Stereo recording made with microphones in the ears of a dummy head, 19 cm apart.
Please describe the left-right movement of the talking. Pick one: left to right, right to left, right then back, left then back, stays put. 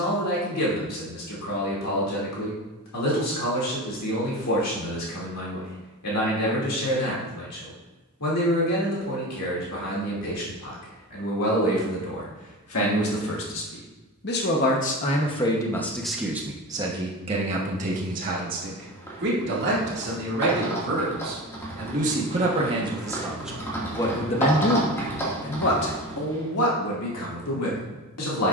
right then back.